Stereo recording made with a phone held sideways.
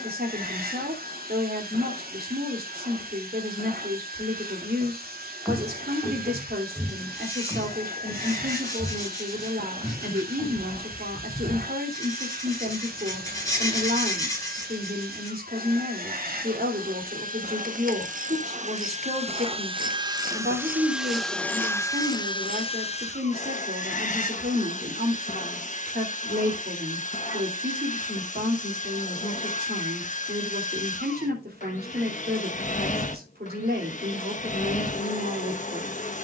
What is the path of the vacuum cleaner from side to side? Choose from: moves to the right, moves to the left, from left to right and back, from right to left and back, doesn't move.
moves to the left.